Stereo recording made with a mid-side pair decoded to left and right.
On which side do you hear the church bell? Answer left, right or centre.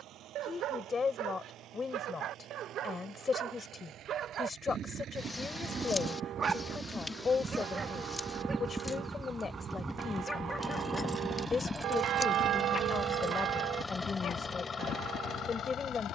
right.